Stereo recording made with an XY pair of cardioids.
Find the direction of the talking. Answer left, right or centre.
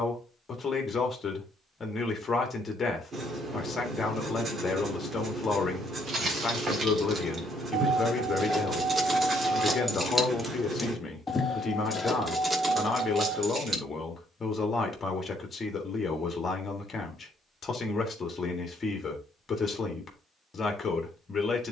left.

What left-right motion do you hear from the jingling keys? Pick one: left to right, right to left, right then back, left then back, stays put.
left then back.